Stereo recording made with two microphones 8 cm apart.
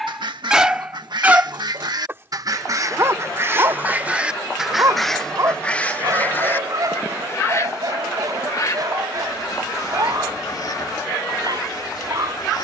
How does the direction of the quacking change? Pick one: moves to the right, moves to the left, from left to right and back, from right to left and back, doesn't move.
moves to the left.